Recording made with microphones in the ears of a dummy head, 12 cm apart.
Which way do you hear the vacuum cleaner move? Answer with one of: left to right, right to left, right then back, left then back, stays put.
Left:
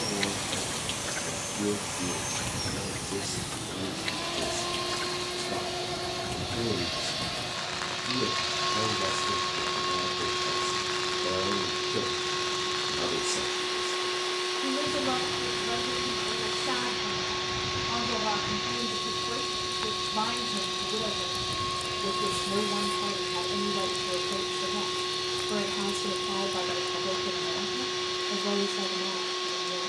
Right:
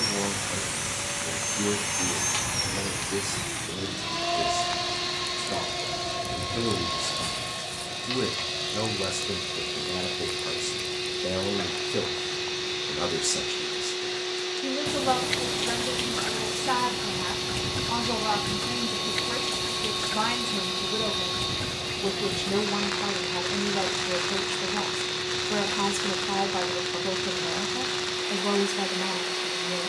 right to left.